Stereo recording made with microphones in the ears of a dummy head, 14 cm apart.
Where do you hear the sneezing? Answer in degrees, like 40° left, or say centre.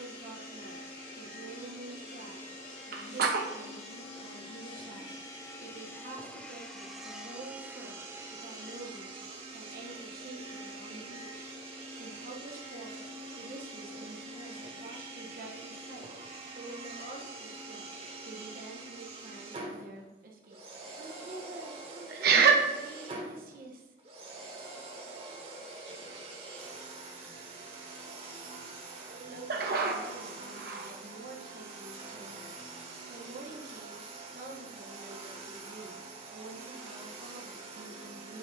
70° right.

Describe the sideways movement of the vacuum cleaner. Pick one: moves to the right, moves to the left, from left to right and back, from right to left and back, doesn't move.
moves to the right.